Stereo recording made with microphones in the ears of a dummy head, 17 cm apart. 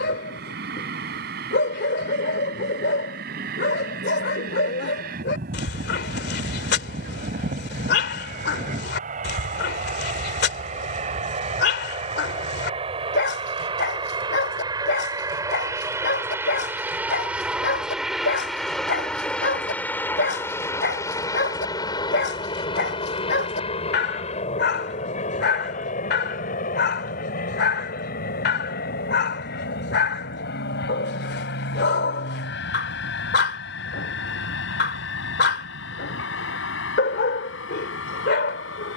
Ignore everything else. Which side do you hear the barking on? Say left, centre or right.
left.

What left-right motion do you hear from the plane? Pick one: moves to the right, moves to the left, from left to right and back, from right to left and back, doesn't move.
moves to the left.